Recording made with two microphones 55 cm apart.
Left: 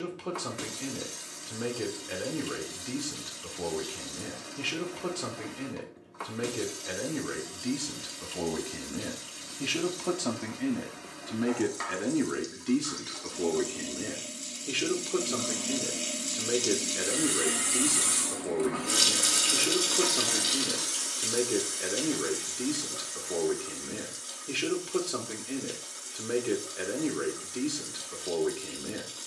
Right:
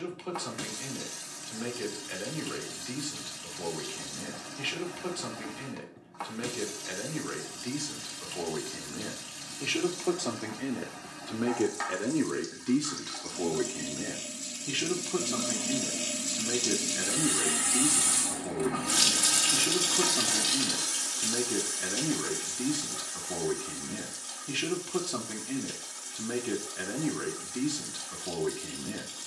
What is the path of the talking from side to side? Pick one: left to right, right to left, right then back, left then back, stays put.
left to right.